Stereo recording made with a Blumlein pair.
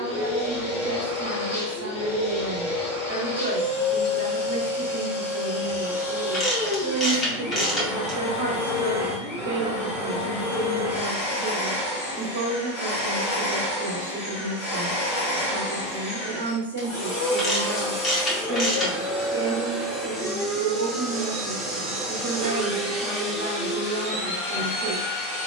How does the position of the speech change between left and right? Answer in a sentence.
In this clip you hear the speech stay in one place.